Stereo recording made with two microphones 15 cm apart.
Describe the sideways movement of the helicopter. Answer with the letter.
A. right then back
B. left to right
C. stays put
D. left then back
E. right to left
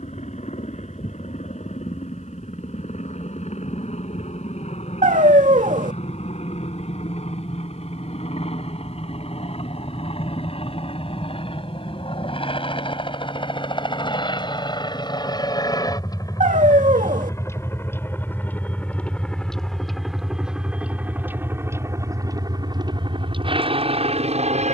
B.